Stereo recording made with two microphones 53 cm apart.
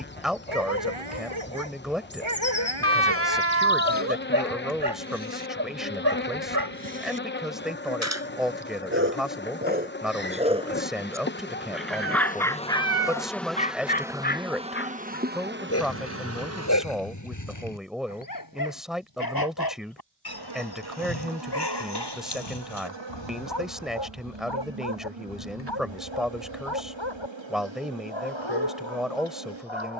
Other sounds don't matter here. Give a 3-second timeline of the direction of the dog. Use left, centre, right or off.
right, right, right, centre, centre, left, left, left, left, left.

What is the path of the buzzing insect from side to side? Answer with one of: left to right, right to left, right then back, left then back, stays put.
left to right.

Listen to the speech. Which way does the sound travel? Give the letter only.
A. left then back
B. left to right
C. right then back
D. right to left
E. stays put
E.